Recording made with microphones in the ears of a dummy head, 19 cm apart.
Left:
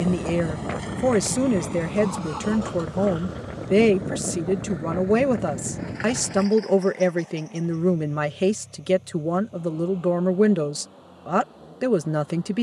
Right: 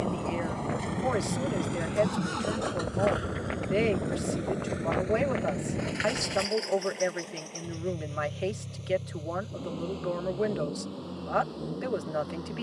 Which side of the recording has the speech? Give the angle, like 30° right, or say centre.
60° left.